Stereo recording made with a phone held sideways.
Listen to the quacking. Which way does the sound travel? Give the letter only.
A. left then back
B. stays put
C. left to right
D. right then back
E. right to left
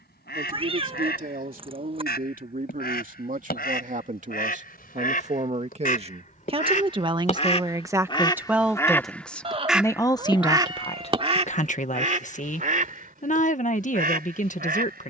C.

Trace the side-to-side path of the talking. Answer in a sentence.
You can hear the talking move to the left.